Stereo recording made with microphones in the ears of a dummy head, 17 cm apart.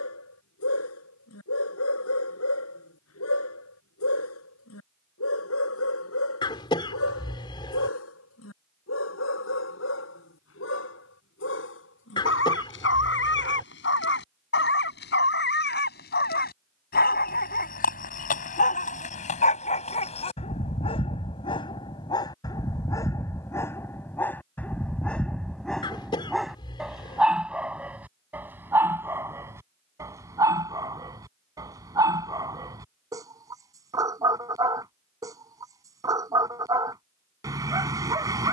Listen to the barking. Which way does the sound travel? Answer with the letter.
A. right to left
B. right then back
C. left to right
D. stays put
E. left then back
C.